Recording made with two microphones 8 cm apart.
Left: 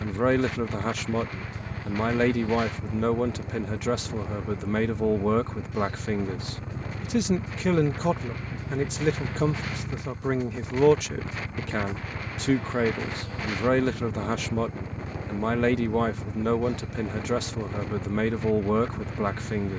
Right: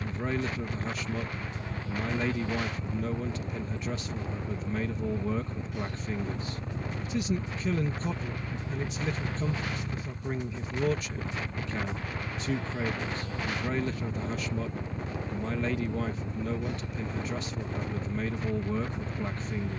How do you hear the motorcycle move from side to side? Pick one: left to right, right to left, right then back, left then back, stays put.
stays put.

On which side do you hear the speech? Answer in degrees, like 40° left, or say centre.
80° left.